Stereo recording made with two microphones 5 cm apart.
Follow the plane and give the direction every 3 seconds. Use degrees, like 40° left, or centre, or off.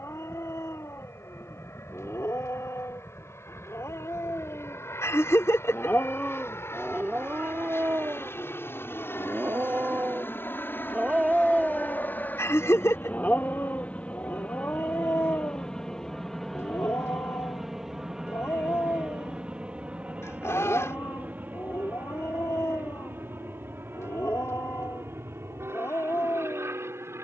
70° left, 70° left, 60° left, 50° left, 30° left, 10° left, 20° right, 40° right, 50° right.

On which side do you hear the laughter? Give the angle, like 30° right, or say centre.
70° left.